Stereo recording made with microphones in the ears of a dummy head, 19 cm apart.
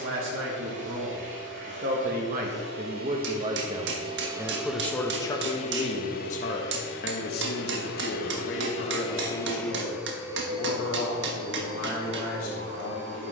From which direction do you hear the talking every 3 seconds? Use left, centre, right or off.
right, centre, left, left, left.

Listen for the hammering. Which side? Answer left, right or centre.
right.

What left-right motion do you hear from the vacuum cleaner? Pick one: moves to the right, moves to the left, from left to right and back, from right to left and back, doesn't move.
from right to left and back.